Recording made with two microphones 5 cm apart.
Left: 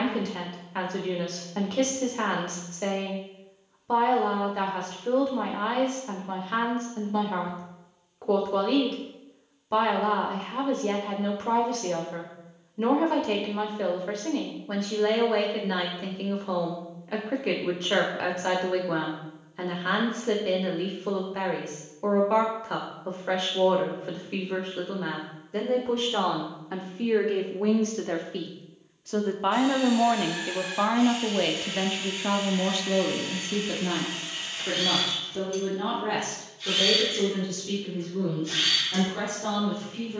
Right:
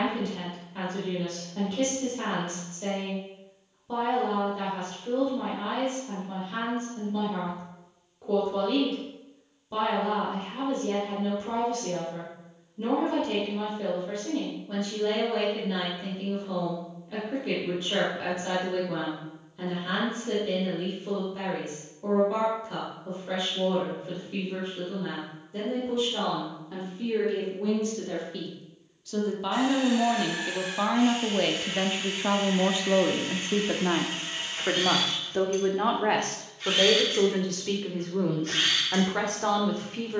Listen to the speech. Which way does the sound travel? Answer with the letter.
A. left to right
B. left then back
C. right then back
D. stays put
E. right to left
A.